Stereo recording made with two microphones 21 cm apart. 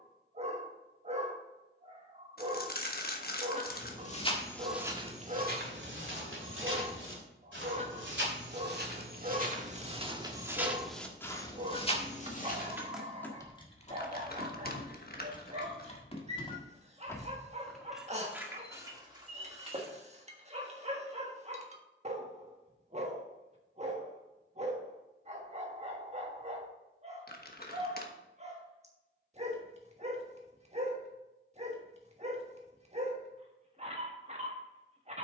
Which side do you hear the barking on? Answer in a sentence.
In this clip you hear the barking on the right.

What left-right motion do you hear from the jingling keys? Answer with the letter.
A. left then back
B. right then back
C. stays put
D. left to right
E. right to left
A.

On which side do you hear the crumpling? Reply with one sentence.
You can hear the crumpling on the left.